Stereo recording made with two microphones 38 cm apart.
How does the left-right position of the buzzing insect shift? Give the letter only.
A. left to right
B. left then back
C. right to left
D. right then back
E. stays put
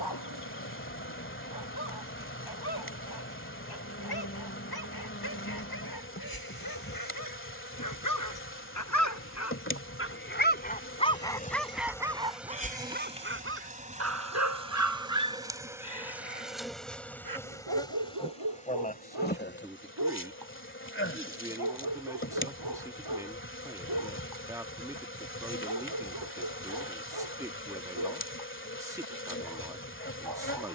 D.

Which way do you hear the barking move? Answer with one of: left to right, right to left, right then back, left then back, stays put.
left to right.